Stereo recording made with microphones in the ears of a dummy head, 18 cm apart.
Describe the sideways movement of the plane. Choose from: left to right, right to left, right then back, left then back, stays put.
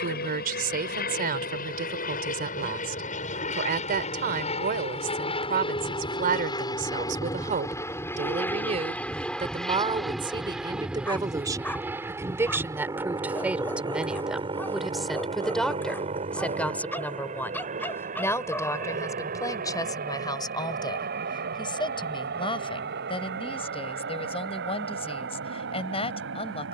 left to right.